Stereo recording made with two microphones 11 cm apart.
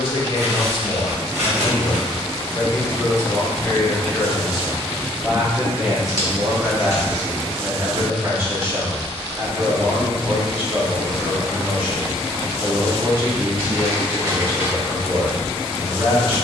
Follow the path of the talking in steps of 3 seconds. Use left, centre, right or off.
left, centre, right, right, right, right.